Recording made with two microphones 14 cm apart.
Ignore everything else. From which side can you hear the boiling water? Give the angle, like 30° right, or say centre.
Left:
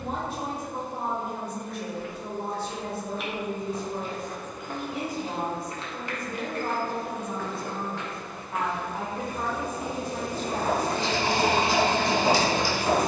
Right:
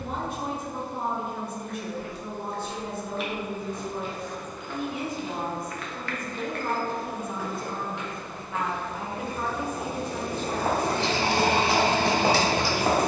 70° right.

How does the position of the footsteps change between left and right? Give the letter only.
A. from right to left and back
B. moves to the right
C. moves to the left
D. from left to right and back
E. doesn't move
A.